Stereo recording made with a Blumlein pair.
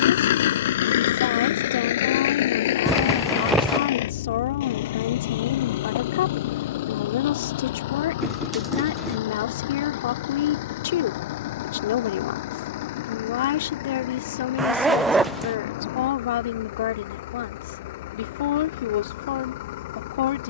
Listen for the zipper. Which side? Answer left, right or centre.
centre.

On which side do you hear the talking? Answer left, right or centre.
left.